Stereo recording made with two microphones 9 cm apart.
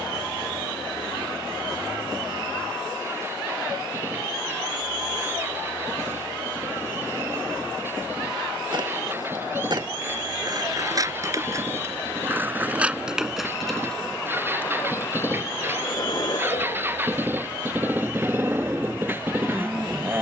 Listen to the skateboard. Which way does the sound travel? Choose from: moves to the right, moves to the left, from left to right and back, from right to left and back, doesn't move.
moves to the left.